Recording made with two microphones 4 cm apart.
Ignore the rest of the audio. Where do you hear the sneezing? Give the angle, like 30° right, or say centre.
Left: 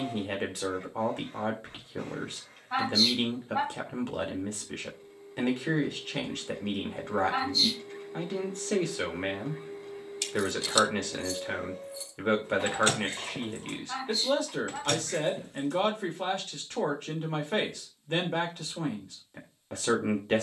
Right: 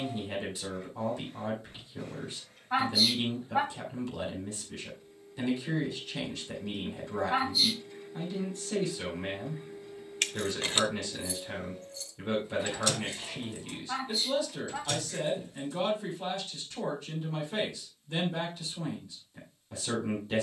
10° right.